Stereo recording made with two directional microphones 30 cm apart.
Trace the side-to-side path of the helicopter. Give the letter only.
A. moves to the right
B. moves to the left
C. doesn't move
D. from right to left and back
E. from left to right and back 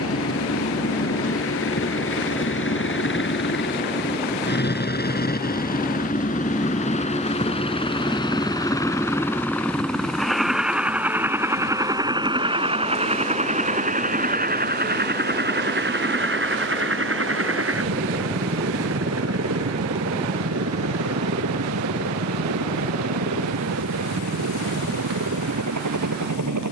A.